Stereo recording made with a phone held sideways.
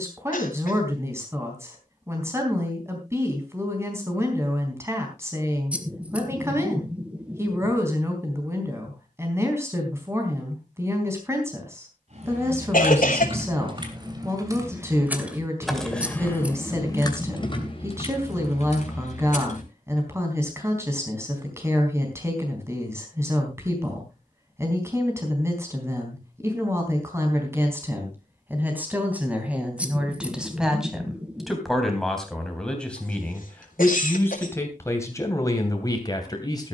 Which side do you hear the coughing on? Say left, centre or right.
left.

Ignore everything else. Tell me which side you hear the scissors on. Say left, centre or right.
centre.